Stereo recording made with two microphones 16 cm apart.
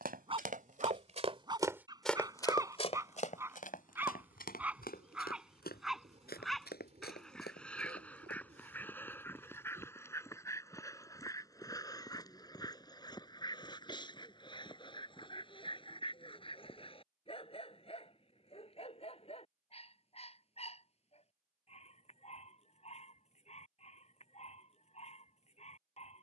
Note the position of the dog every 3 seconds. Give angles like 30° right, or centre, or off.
30° right, 10° right, 10° left, 20° left, 30° left, 30° left, 40° left, 40° left, 40° left.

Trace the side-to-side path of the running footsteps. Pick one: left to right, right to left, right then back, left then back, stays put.
right to left.